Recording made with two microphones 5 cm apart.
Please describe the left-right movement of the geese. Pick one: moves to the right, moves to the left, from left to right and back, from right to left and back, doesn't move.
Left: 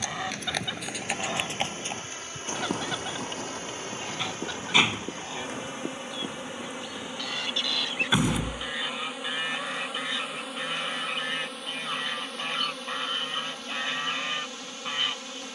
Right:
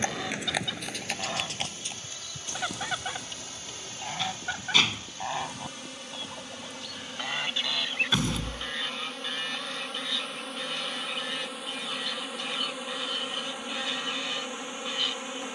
from left to right and back.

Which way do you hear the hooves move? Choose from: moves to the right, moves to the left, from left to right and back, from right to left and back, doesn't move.
moves to the left.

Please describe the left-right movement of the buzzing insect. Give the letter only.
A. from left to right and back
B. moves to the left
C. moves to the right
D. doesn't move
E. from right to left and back
C.